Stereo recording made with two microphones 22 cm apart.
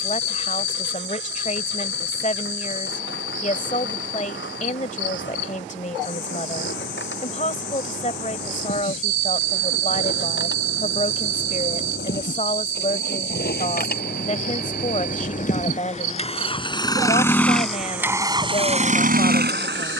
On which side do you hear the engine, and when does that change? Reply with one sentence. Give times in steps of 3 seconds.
In this clip you hear the engine on the left from 0 s and on the right from 18 s.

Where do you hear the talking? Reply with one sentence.
In this clip you hear the talking on the left.